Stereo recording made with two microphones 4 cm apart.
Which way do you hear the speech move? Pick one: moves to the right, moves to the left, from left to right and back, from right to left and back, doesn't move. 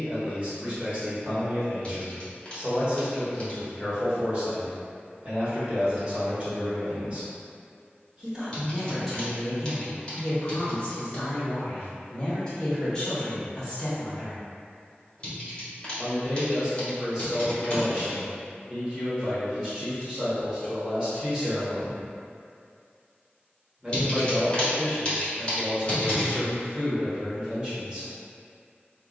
from right to left and back.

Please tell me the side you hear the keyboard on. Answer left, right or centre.
left.